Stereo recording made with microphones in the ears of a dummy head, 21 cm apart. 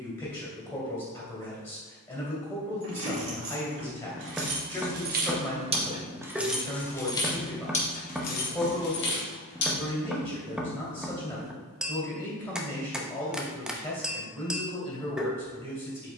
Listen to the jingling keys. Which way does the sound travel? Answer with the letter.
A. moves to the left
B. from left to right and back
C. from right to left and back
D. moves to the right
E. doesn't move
A.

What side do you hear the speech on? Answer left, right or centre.
centre.